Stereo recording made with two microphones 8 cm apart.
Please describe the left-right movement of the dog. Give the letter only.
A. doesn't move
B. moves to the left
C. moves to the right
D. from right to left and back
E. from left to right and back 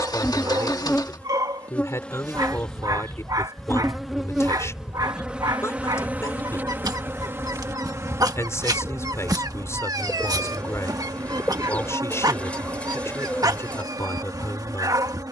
A.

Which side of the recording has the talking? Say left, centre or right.
left.